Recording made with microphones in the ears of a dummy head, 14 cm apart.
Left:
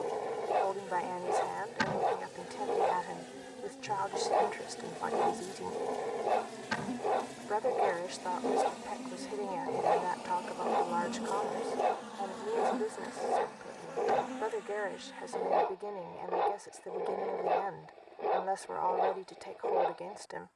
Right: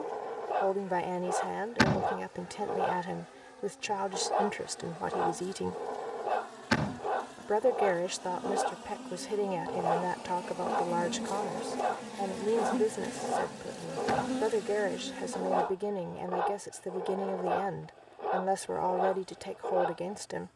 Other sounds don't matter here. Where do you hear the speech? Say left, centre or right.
right.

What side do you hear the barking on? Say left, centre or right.
centre.